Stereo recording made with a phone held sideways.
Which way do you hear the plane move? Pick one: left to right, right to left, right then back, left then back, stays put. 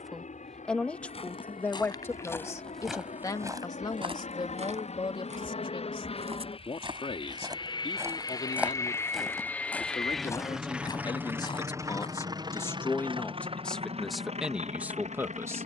left to right.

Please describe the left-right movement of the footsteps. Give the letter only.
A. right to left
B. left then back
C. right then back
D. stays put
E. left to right
C.